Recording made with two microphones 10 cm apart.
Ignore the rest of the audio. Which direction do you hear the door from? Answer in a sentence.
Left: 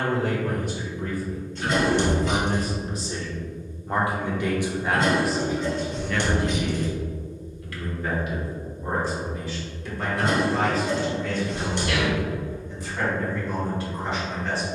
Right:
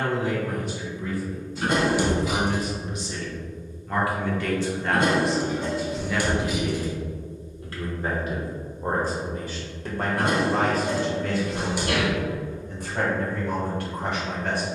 You can hear the door in the centre.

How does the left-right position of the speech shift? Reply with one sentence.
You can hear the speech move from left to right.